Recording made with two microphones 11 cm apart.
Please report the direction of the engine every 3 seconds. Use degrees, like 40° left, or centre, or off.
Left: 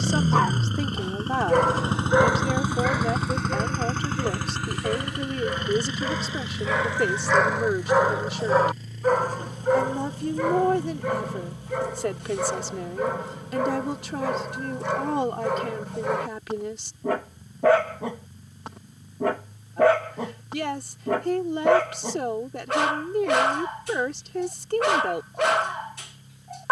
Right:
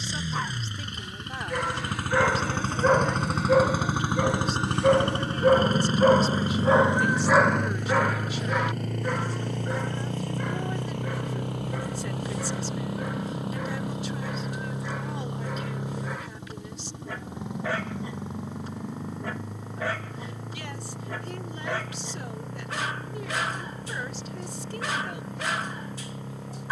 30° left, 20° right, 50° right, 60° right, 70° right, 70° right, 80° right, 80° right, 80° right.